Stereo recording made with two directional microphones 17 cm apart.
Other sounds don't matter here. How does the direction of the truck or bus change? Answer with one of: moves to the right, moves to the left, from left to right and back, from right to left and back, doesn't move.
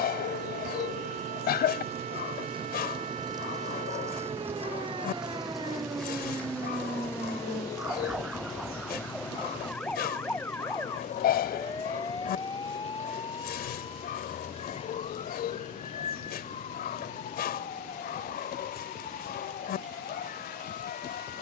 moves to the left.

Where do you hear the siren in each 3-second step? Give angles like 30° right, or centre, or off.
50° right, 30° right, 10° right, 10° left, 30° left, 40° left, 50° left.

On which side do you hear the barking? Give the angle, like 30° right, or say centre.
70° left.